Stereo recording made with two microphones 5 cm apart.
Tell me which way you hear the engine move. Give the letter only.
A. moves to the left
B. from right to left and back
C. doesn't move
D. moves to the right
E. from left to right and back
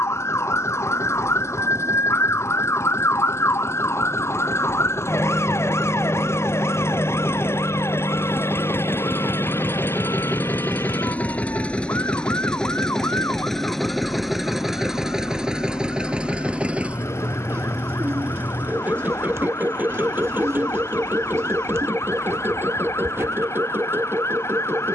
D.